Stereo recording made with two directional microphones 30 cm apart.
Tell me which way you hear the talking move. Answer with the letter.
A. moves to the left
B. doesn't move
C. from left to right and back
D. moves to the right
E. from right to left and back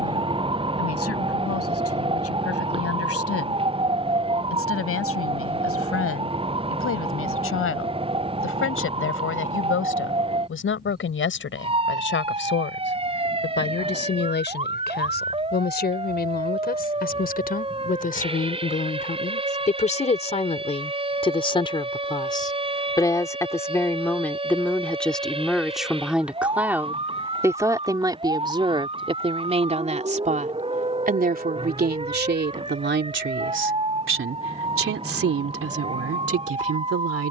D.